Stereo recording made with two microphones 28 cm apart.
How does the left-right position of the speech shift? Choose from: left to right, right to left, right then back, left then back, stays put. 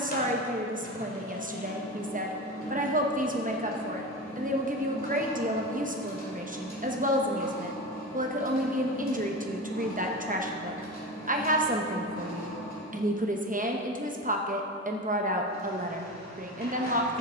stays put.